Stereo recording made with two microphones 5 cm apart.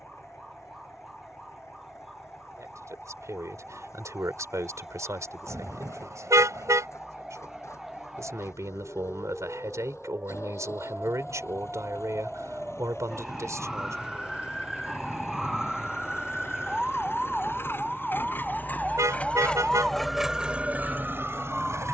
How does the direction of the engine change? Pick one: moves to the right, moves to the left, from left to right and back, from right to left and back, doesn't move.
moves to the right.